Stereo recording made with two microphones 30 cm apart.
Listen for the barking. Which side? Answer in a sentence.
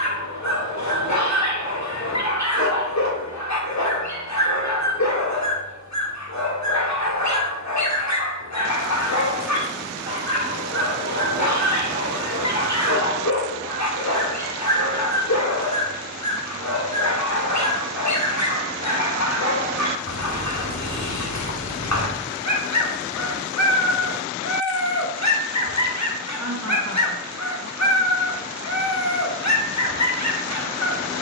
You can hear the barking on the left.